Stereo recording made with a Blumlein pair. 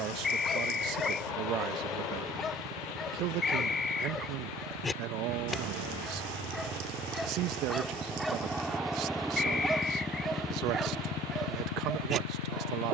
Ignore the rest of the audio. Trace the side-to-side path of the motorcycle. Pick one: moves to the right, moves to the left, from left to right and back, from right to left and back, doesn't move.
moves to the left.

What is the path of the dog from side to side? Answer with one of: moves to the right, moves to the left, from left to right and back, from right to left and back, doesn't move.
moves to the right.